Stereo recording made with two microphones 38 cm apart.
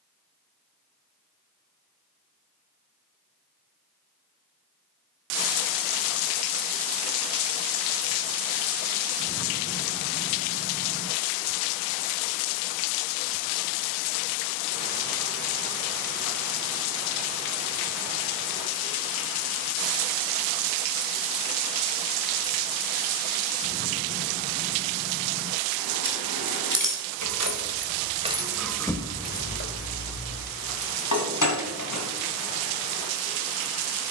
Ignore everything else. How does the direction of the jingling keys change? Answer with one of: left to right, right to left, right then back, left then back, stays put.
right to left.